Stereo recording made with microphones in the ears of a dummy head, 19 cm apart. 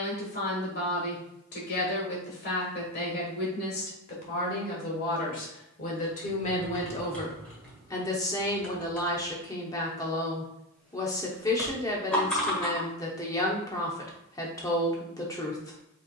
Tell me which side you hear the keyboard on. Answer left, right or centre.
centre.